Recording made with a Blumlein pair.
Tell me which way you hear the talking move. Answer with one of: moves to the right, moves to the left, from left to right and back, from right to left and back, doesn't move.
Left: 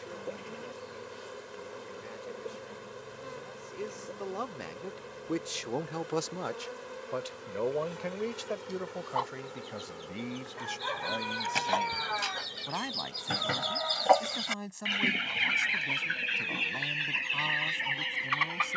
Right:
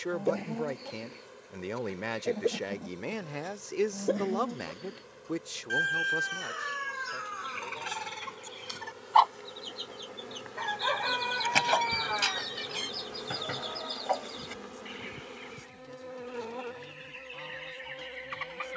moves to the left.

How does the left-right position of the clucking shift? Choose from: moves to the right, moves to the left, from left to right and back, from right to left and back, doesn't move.
moves to the left.